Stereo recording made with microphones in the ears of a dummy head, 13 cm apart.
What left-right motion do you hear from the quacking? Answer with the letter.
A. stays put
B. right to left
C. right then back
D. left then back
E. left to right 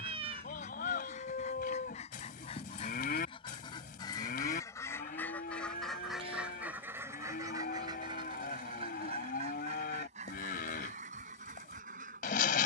E.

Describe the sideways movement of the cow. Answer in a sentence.
You can hear the cow stay in one place.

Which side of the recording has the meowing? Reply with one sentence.
You can hear the meowing on the right.